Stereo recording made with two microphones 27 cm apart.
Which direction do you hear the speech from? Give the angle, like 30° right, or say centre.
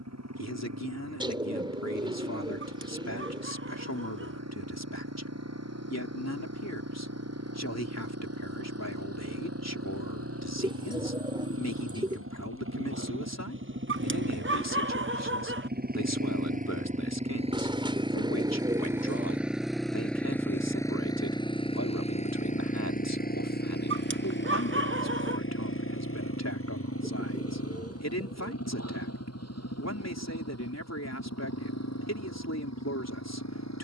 70° left.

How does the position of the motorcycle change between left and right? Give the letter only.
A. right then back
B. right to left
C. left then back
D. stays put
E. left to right
B.